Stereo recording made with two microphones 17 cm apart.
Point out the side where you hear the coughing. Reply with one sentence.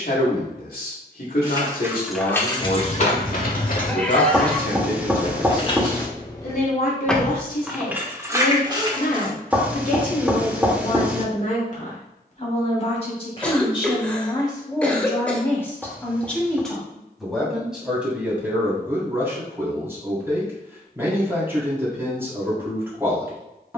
In this clip you hear the coughing in the centre.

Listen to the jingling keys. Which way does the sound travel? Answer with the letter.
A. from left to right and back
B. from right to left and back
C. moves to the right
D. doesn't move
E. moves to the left
B.